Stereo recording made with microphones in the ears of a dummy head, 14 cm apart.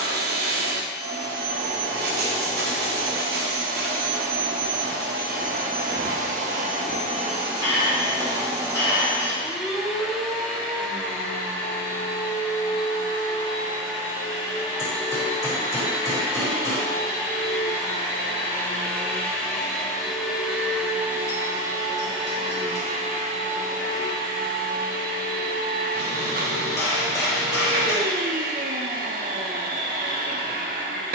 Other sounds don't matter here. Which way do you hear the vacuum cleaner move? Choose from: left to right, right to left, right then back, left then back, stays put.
left then back.